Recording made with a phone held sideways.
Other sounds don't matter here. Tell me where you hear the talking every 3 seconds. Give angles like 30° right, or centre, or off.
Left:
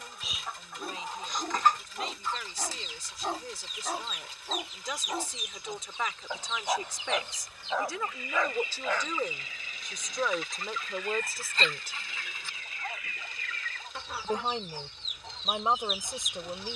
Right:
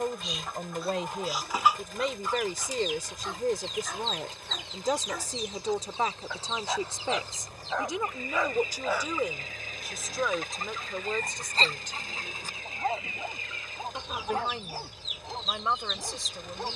70° right, 50° right, 20° right, centre, 20° left, 20° left.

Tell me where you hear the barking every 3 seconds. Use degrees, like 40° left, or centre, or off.
50° left, 30° left, 10° left, 30° right, 50° right, 60° right.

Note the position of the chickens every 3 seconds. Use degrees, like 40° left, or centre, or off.
10° right, 30° right, 40° right, 40° right, 20° right, centre.